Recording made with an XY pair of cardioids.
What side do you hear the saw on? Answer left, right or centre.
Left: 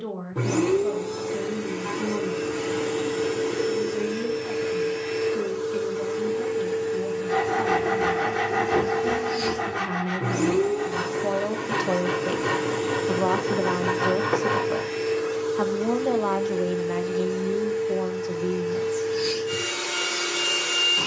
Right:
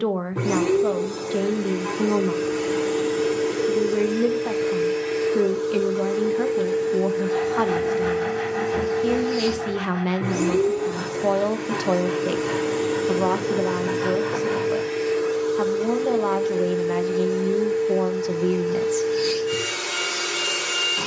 left.